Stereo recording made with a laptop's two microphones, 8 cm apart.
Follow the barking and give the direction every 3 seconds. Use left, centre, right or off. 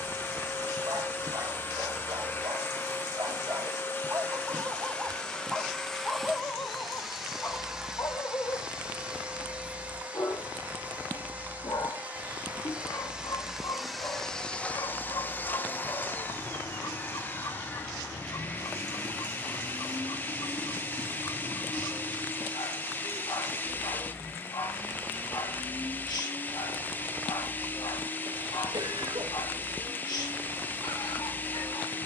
right, right, left, left, left, left, left, left, left, left, left.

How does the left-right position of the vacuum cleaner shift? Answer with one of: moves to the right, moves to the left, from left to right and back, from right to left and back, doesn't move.
from left to right and back.